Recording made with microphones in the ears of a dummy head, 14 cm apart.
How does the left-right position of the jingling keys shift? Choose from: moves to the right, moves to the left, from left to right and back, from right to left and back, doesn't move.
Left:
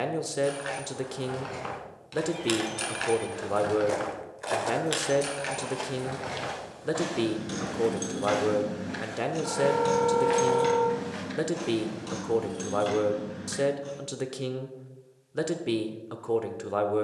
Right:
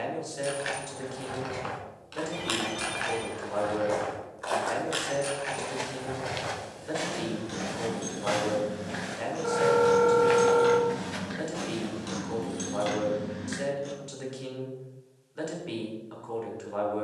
from right to left and back.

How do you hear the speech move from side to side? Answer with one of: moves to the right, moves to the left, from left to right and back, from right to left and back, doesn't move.
doesn't move.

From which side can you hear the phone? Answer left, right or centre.
right.